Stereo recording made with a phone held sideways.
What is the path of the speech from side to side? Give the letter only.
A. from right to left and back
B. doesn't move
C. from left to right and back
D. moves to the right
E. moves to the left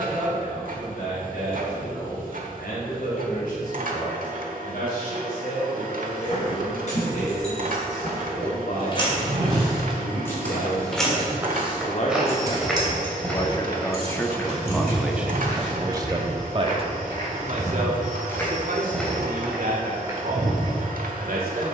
D.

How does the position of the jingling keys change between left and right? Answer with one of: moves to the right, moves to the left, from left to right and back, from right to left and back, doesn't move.
moves to the right.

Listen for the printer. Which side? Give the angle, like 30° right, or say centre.
60° right.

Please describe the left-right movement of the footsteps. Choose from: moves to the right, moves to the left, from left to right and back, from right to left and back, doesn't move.
from right to left and back.